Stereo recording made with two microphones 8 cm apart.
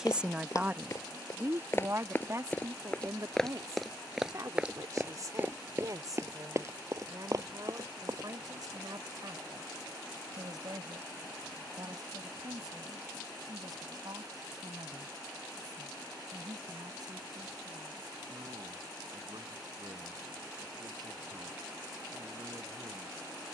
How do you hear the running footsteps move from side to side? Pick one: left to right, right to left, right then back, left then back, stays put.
left to right.